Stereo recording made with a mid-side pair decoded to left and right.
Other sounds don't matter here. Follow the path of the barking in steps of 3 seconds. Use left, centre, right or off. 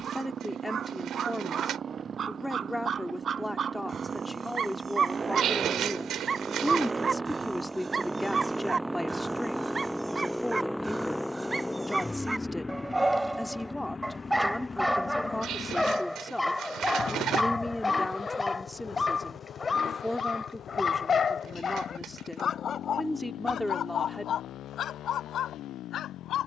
right, right, right, right, centre, centre, left, left, left.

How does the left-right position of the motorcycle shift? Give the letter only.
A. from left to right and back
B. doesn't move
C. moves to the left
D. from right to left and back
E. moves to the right
C.